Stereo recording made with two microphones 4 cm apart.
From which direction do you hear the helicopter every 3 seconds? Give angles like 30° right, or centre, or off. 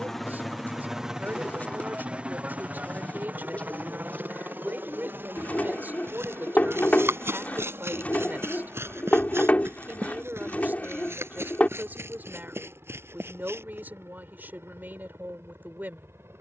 20° right, 50° right, 60° right, 70° right, 70° right, 80° right.